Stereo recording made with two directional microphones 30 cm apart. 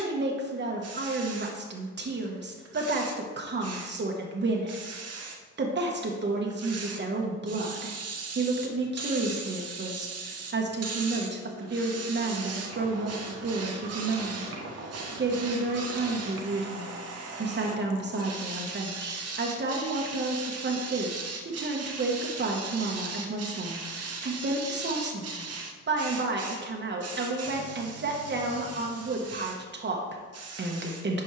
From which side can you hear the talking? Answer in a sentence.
In this clip you hear the talking on the right.